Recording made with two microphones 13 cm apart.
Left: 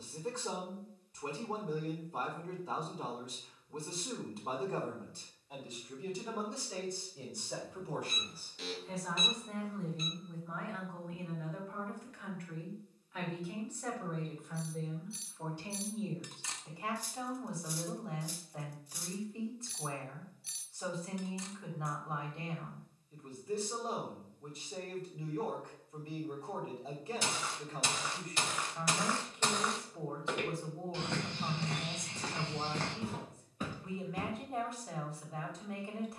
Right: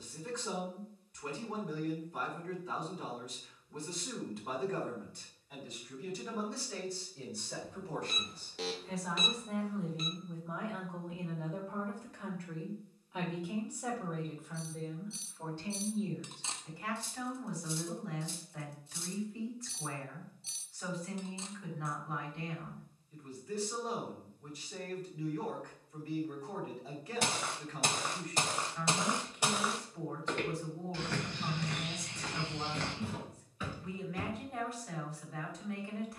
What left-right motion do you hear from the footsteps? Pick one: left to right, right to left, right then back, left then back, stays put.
right to left.